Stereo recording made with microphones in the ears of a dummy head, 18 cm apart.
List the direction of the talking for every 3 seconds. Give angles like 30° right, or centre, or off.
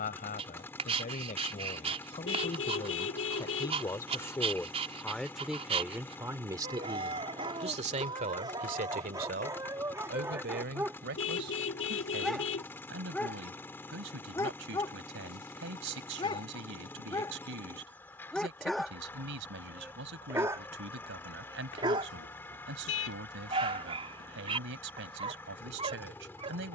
40° left, 10° left, 30° right, 60° right, 70° right, 70° right, 70° right, 70° right, 70° right.